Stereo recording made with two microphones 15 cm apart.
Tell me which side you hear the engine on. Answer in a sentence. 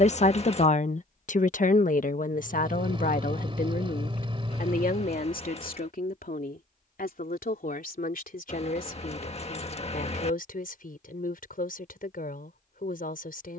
You can hear the engine on the right.